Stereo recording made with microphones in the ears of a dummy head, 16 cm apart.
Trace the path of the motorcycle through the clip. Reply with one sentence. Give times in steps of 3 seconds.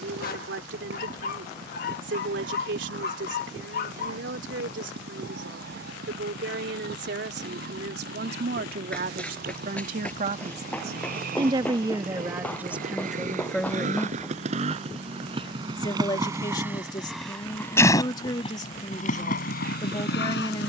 In this clip you hear the motorcycle on the right from 0 s, in the centre from 15 s and on the left from 18 s.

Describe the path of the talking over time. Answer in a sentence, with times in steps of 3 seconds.
In this clip you hear the talking on the right from 0 s, in the centre from 12 s and on the left from 15 s.